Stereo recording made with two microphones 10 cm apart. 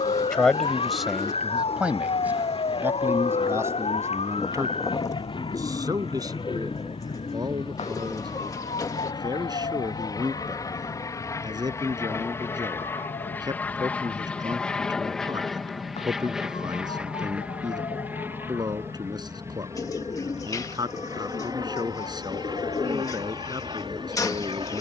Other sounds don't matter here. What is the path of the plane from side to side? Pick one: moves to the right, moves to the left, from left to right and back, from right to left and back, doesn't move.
moves to the right.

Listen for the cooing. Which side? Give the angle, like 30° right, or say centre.
30° left.